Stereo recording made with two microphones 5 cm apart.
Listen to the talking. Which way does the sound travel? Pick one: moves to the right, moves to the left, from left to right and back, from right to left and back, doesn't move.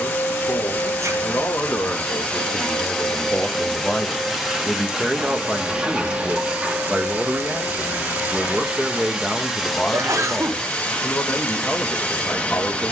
from left to right and back.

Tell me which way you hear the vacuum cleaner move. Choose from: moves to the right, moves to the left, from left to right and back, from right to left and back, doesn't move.
from left to right and back.